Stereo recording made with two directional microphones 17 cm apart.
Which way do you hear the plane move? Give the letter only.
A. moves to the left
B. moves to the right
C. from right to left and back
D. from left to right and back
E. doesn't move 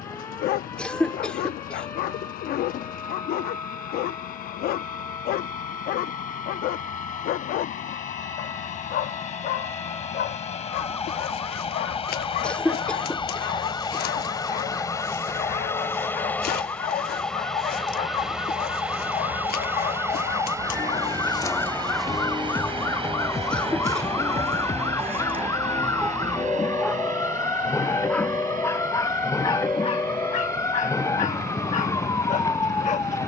B.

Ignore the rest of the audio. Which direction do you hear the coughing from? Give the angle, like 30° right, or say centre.
10° left.